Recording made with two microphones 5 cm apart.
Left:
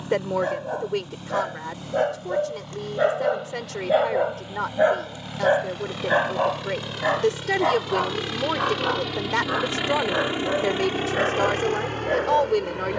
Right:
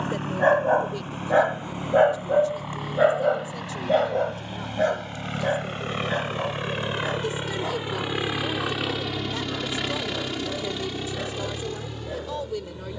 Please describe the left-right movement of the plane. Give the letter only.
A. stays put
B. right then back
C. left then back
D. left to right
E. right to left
E.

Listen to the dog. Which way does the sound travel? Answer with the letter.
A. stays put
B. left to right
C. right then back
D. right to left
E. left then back
D.